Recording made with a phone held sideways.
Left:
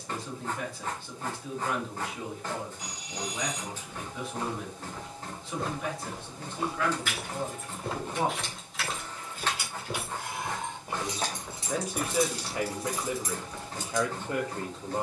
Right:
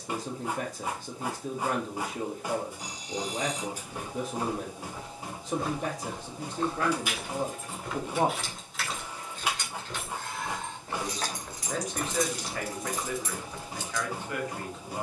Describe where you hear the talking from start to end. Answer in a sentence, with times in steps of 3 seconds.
You can hear the talking on the right from 0 s, in the centre from 9 s and on the left from 12 s.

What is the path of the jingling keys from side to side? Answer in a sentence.
In this clip you hear the jingling keys travel towards the left.